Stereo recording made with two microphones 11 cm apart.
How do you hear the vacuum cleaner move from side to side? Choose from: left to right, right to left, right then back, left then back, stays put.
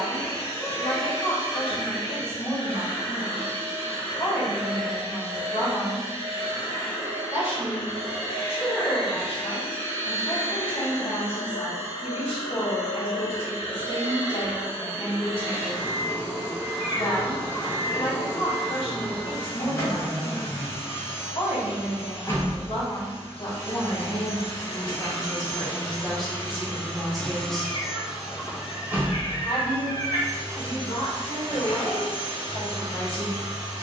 left to right.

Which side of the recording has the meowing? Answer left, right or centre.
left.